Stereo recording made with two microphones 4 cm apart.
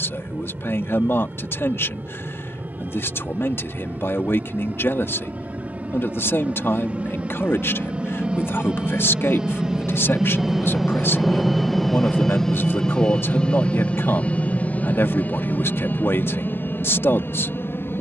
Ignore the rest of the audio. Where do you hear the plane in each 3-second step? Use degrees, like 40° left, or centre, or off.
50° right, 40° right, 30° right, 10° right, 20° left, 50° left.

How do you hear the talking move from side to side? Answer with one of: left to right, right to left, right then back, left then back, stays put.
stays put.